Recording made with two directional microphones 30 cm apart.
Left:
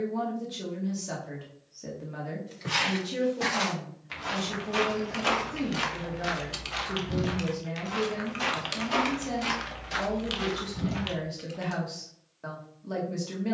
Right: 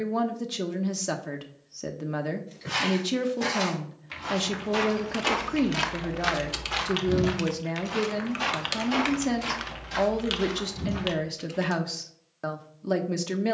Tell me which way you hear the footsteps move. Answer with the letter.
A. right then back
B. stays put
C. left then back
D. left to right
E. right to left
A.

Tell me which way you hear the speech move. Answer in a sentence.
You can hear the speech stay put.